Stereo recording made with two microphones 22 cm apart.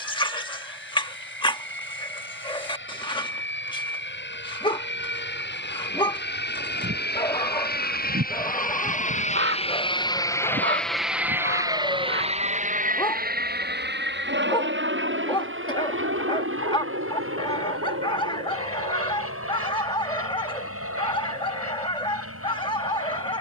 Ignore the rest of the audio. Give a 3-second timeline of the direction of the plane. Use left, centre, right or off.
left, left, left, centre, right, right, right, right.